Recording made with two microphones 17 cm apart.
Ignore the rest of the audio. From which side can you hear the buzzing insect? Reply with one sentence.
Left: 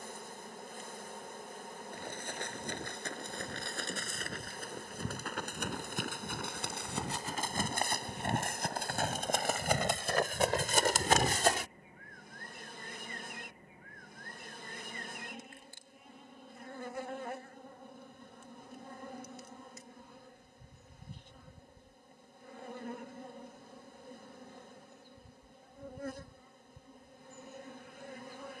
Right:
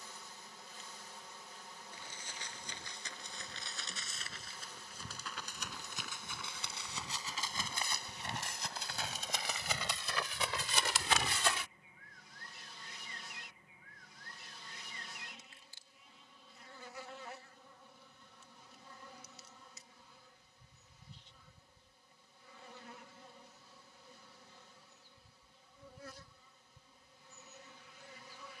In this clip you hear the buzzing insect on the left.